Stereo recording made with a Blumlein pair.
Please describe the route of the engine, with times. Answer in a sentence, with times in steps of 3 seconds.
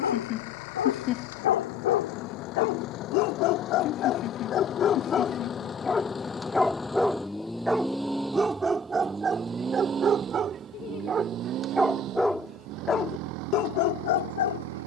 In this clip you hear the engine on the left from 0 s, in the centre from 6 s and on the right from 9 s.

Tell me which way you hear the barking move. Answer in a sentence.
In this clip you hear the barking move from left to right and back again.